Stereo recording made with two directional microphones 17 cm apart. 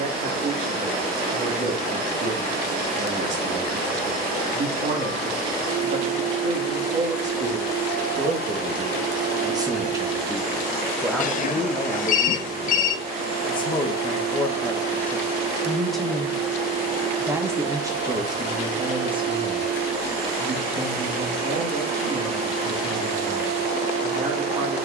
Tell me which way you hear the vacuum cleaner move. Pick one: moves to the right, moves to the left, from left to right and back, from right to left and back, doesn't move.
doesn't move.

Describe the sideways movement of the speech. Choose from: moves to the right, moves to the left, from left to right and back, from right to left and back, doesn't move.
from right to left and back.